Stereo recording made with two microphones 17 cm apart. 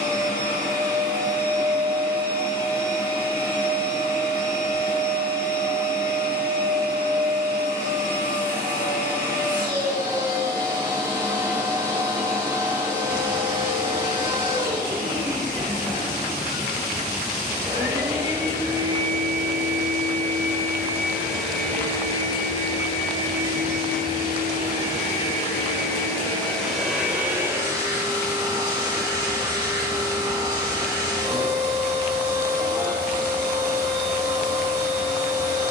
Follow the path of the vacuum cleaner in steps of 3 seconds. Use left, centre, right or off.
right, right, right, right, right, right, right, left, left, right, right, right.